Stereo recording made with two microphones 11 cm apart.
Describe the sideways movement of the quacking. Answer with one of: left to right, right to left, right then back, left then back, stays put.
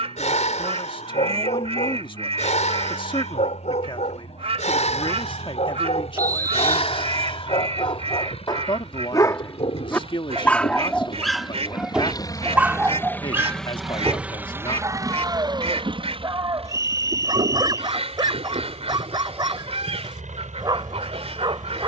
stays put.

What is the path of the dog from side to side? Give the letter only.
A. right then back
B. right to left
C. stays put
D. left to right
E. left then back
D.